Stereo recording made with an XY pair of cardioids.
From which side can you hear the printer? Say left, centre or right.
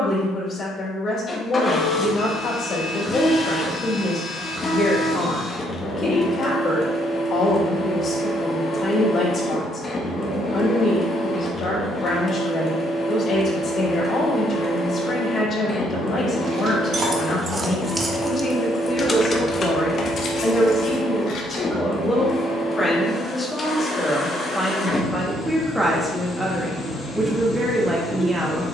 left.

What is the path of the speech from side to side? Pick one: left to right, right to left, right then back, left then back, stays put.
left to right.